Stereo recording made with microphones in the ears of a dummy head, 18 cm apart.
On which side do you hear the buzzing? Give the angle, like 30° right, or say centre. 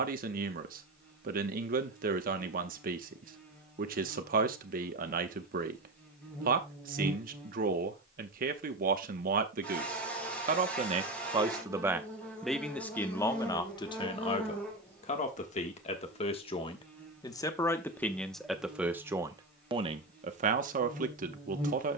10° left.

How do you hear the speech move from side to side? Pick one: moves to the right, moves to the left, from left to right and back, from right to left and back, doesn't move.
from right to left and back.